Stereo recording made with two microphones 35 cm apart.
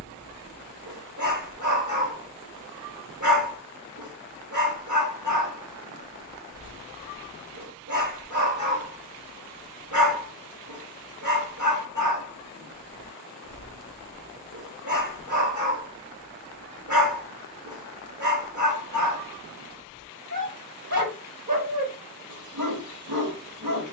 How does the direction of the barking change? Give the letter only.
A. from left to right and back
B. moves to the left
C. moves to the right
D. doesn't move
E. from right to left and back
D.